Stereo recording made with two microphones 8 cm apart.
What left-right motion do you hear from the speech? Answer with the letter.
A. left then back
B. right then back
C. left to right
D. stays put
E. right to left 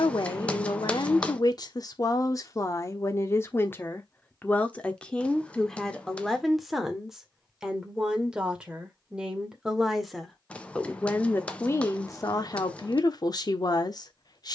B.